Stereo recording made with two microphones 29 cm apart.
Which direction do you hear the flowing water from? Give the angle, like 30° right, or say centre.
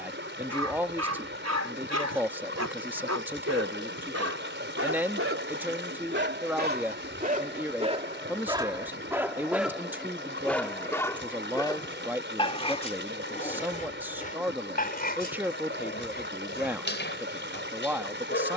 40° right.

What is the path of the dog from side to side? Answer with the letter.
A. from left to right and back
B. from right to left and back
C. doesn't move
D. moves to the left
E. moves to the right
D.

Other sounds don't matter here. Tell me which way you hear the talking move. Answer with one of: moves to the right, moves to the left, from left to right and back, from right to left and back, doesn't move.
doesn't move.